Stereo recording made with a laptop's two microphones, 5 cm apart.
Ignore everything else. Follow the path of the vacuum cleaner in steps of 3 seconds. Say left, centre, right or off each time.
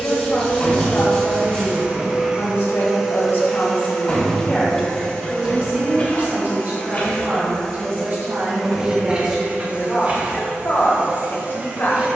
right, centre, centre, right.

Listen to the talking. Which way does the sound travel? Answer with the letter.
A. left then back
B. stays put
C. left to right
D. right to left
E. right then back
E.